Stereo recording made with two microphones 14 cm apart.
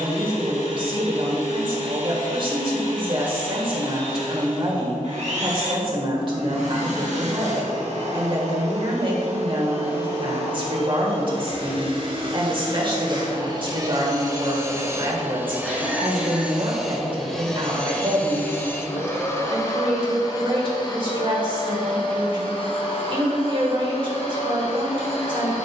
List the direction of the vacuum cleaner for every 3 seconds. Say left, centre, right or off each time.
right, right, right, right, right, centre, left, left, left.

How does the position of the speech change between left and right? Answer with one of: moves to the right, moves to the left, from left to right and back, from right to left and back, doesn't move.
doesn't move.